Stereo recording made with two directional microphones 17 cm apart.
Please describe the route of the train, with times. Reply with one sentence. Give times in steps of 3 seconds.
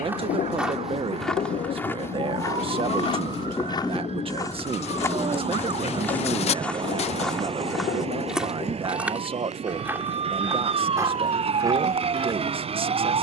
You can hear the train on the left from 0 s, in the centre from 3 s and on the right from 6 s.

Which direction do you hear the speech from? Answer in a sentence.
You can hear the speech on the right.